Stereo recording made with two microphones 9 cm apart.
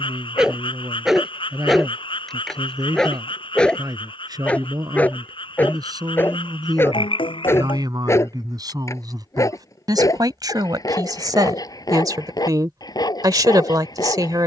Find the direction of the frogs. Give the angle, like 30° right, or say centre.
90° left.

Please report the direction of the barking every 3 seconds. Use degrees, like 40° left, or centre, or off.
centre, 10° left, 30° left, 40° left, 50° left.